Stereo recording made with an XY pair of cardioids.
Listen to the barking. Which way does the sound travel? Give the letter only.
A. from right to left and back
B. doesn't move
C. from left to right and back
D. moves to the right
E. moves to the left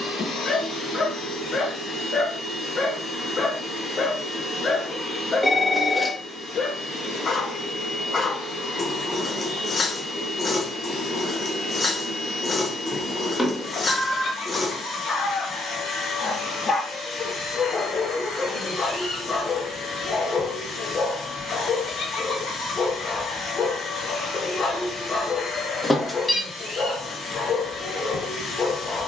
B.